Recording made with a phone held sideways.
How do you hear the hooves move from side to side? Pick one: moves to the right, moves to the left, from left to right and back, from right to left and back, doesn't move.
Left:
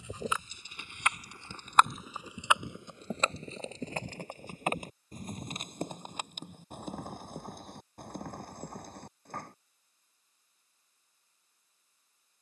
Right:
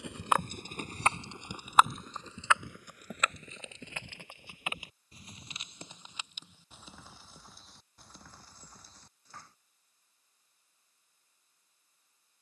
moves to the left.